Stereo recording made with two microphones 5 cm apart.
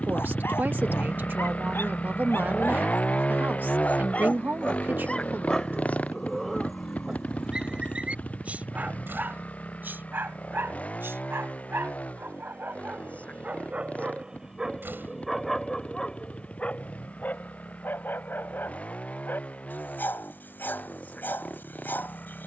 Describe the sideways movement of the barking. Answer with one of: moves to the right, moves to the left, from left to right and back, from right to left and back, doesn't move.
from left to right and back.